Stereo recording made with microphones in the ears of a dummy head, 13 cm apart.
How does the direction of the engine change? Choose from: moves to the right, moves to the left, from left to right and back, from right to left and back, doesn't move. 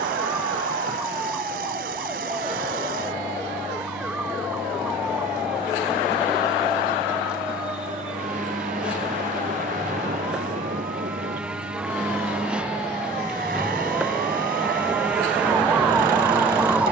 doesn't move.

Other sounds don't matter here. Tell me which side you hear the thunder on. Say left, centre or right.
right.